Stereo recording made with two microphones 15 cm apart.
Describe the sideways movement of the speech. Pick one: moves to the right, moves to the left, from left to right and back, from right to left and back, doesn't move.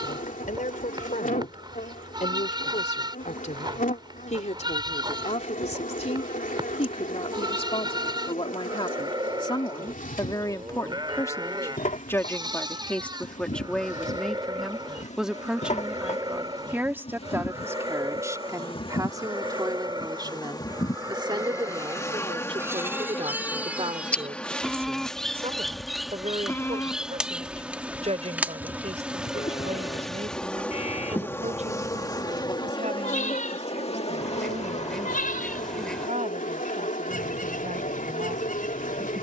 moves to the right.